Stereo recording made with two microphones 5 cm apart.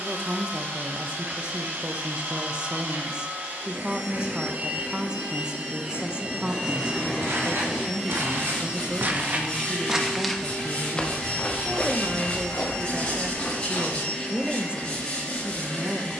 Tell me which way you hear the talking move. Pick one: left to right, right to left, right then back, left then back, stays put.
stays put.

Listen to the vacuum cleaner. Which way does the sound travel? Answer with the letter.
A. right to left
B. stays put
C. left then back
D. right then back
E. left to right
A.